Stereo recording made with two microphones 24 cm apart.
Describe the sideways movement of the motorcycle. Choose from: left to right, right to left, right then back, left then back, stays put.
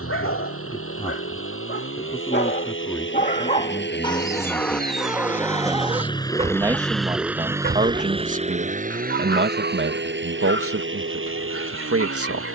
left to right.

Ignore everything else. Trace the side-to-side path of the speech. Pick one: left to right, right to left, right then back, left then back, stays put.
left to right.